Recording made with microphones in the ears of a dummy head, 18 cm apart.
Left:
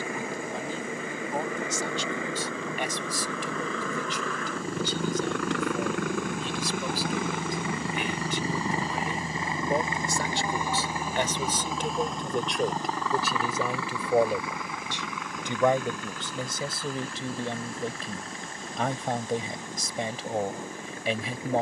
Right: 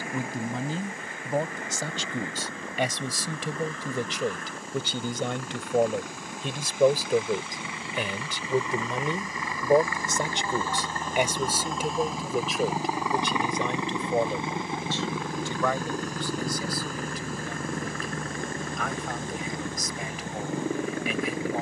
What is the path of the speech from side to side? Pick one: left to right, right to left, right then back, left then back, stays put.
right to left.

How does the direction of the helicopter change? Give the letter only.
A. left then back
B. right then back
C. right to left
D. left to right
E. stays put
D.